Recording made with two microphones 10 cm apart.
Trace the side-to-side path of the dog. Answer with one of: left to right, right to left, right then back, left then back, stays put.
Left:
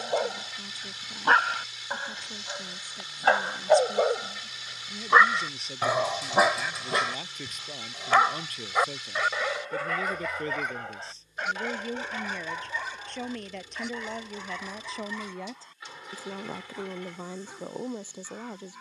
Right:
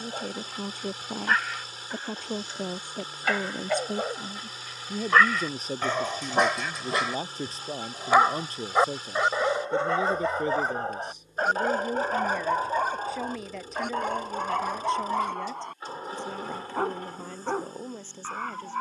left to right.